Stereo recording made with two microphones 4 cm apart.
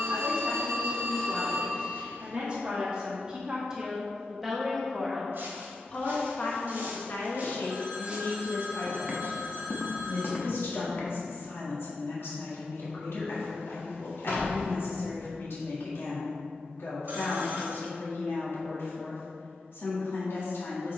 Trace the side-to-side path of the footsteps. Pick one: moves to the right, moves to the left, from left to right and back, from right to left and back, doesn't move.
moves to the left.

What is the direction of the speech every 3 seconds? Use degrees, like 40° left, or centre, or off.
30° right, centre, 50° left, 70° left, 70° left, 70° left, 70° left.